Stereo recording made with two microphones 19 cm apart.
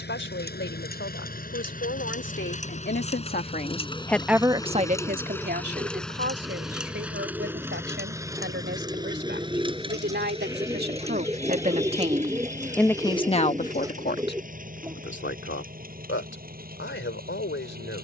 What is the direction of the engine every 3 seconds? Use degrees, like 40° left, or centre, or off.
50° left, 20° left, 10° right, 30° right, 40° right, 50° right.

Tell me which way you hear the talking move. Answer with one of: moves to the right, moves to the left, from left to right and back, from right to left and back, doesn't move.
from left to right and back.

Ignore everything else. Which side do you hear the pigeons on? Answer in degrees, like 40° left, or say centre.
20° right.